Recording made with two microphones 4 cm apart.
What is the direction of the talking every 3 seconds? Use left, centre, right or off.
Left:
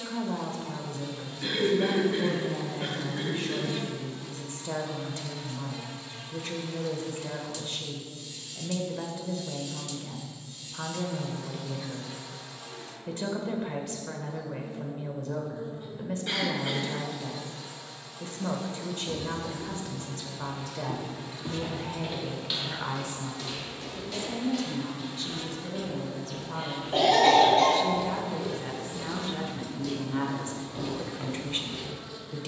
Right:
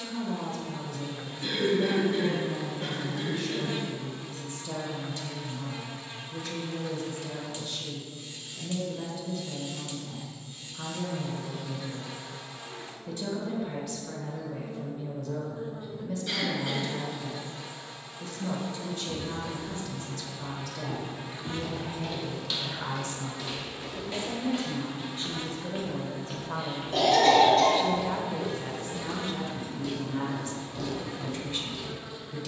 left, left, left, left, left, left, left, left, right, centre, left.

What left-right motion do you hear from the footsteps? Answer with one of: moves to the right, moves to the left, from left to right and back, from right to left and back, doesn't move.
from left to right and back.